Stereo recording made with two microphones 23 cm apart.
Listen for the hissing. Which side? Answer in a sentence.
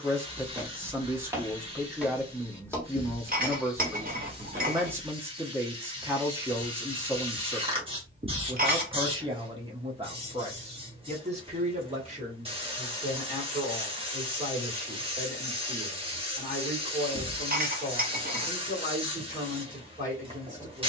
You can hear the hissing on the right.